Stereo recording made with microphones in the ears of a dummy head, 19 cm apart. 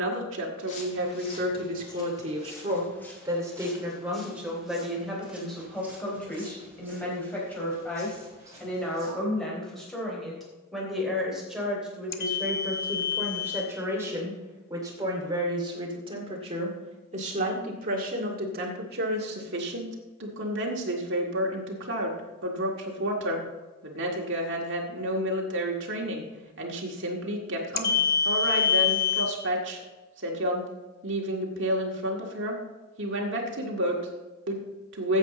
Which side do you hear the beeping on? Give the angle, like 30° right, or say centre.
50° left.